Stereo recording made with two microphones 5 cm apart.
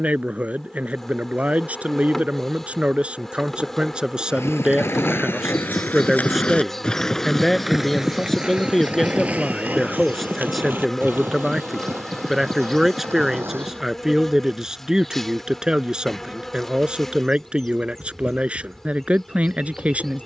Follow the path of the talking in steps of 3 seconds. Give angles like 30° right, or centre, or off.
30° right, 20° right, centre, centre, 10° right, 20° right, 30° right.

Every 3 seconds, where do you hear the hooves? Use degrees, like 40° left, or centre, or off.
off, 50° left, centre, 40° right, 50° right, off, off.